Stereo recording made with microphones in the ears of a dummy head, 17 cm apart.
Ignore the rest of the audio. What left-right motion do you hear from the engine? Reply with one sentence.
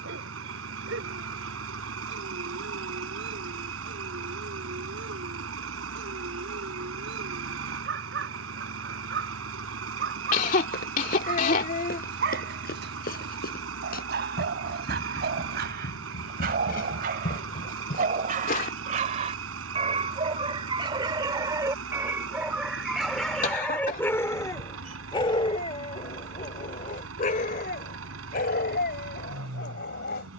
You can hear the engine stay put.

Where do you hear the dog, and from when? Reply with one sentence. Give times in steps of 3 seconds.
In this clip you hear the dog on the right from 0 s, in the centre from 21 s and on the left from 24 s.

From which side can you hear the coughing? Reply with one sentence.
You can hear the coughing on the left.